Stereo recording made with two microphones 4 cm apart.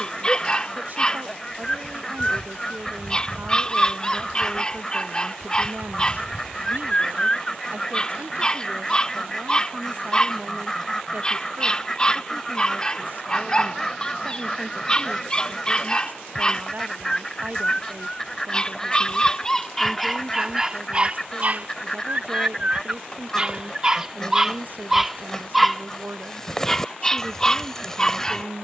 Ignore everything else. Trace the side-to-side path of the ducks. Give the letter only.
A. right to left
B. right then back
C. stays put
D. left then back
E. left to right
C.